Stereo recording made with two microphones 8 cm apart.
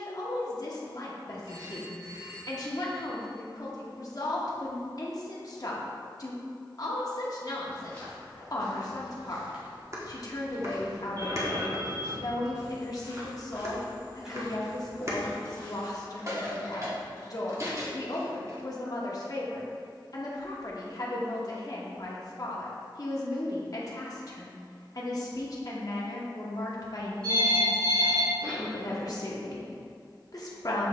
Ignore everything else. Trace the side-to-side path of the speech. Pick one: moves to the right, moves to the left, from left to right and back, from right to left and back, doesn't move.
doesn't move.